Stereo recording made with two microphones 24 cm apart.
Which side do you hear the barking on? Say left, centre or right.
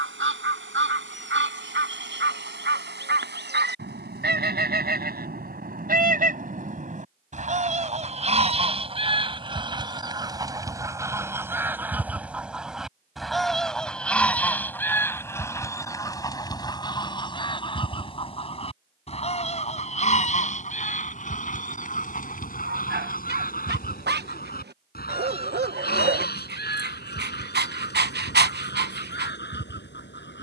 right.